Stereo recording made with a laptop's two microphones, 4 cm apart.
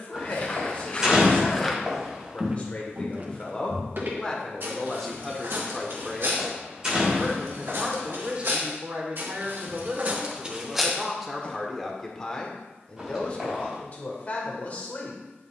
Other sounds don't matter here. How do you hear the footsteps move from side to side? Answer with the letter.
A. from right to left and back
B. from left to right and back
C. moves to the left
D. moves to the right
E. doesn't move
B.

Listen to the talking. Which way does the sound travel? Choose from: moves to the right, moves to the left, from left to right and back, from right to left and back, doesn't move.
from left to right and back.